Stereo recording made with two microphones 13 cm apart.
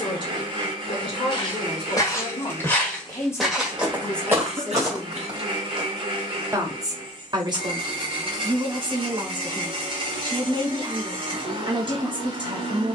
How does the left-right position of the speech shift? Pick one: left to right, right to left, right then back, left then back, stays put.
left to right.